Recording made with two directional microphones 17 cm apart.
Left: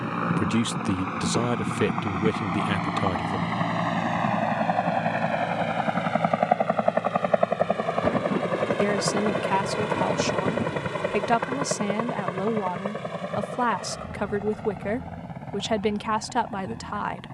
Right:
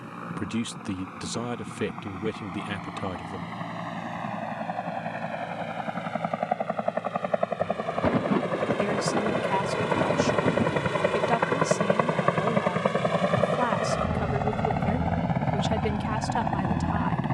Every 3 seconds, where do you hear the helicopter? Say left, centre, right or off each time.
left, left, left, centre, right, right.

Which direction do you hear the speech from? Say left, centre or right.
left.